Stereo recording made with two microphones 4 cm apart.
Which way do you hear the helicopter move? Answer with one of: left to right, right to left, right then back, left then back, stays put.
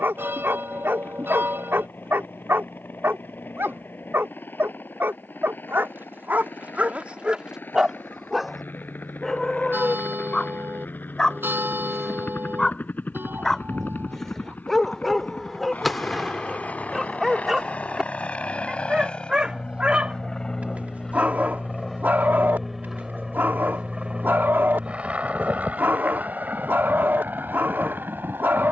left to right.